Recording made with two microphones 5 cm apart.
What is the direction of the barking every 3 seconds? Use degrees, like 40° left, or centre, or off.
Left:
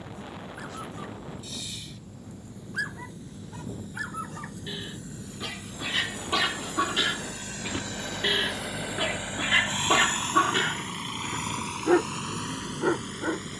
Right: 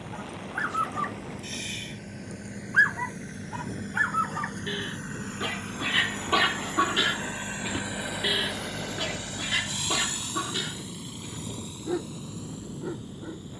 50° right, 30° right, centre, 40° left, 60° left.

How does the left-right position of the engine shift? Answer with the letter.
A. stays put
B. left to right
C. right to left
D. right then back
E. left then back
C.